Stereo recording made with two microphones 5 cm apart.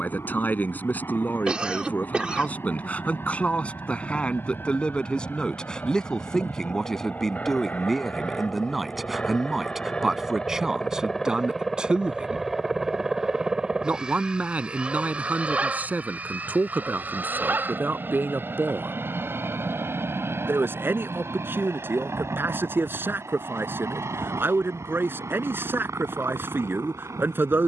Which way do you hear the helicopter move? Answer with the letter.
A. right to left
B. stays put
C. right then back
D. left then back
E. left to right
E.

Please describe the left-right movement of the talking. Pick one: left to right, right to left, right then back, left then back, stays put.
left to right.